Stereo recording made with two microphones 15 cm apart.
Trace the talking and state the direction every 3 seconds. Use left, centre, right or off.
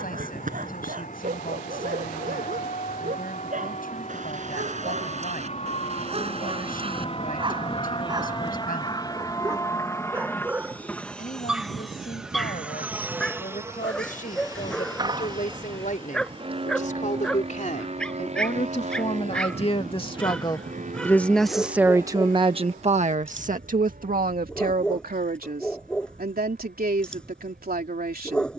left, left, left, left, left, left, left, right, right, right.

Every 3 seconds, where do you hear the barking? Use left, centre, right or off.
right, right, right, centre, centre, centre, centre, centre, centre, centre.